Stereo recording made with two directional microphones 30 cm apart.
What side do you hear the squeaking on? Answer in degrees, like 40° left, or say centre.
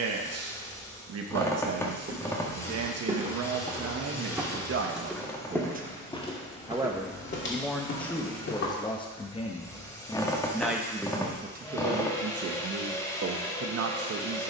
10° left.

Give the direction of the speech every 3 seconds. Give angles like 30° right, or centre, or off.
50° right, 40° right, centre, centre, 50° right.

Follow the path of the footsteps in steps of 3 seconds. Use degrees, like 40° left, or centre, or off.
30° right, 10° right, 30° left, off, off.